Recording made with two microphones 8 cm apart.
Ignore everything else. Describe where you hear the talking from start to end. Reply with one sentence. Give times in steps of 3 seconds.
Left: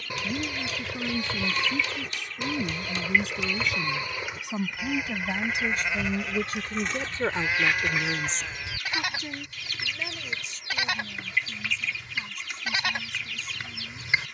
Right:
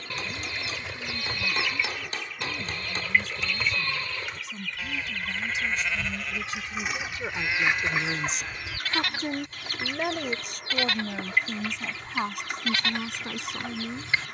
You can hear the talking on the left from 0 s and on the right from 9 s.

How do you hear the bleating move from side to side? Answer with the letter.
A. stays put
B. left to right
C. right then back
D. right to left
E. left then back
A.